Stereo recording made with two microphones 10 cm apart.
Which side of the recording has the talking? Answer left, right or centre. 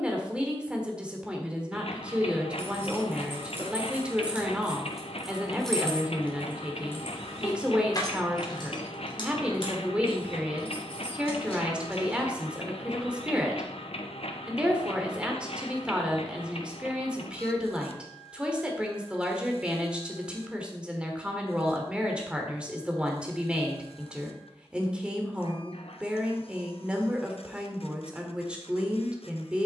centre.